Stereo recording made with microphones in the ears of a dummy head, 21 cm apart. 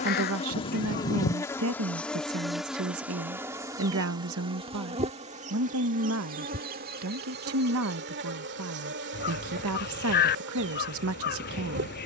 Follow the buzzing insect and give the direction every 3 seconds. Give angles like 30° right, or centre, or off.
10° left, 20° right, 40° right, 50° right.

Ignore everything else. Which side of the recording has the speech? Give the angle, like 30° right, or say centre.
60° right.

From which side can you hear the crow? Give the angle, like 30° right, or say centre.
40° left.